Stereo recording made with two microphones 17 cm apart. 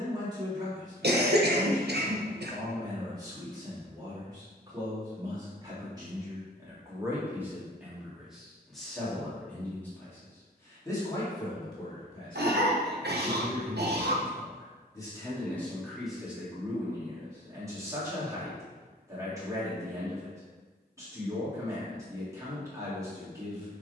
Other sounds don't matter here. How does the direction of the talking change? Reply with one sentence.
You can hear the talking go left and come back.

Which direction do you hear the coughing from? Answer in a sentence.
You can hear the coughing on the right.